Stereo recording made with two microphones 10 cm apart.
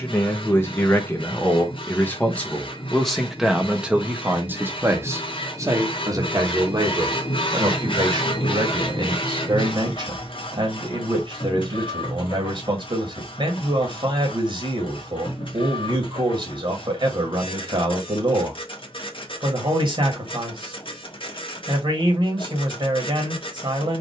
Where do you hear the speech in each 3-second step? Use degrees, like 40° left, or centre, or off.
20° left, 20° right, 50° right, 50° right, 50° right, 50° right, 50° right, 50° right.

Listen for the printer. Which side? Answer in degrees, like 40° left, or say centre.
60° left.